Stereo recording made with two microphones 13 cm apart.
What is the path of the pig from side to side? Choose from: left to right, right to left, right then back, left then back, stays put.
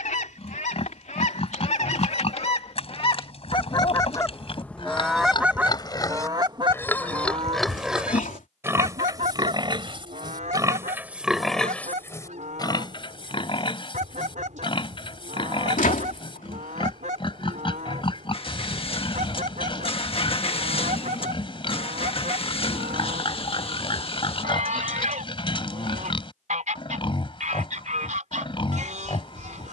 right then back.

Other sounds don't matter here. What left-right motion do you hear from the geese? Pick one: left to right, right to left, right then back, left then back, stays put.
left to right.